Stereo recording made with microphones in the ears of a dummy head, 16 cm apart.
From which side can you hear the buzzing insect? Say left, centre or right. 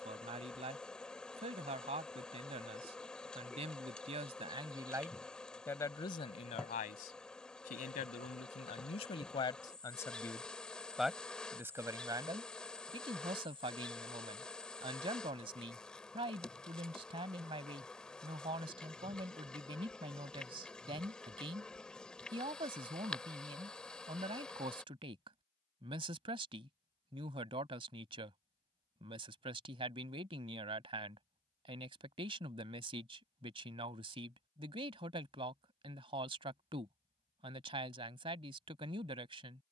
centre.